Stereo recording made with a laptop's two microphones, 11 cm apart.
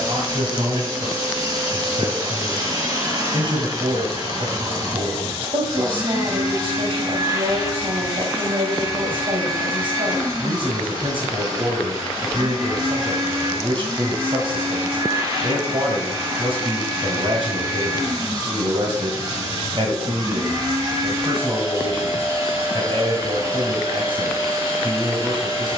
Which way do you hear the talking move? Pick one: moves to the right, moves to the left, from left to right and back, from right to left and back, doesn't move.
doesn't move.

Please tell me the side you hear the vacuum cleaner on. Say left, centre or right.
right.